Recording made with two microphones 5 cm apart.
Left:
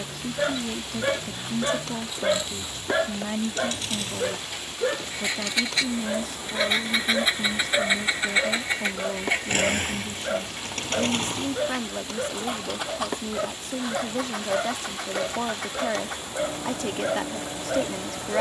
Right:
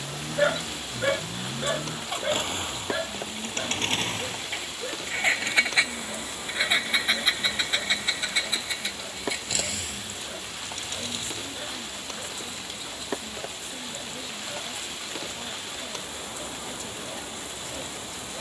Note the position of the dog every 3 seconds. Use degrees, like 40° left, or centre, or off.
10° left, 40° left, 50° left, 60° left, 60° left, 60° left.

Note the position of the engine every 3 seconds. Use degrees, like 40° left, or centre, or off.
60° right, 40° right, 10° left, 50° left, 70° left, 80° left.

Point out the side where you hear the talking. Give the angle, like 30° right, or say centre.
90° left.